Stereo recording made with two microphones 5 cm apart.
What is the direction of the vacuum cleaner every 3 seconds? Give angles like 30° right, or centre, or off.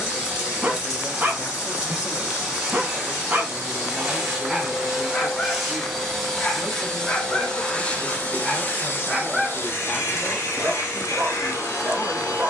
20° right, 10° right, 20° left, 60° left.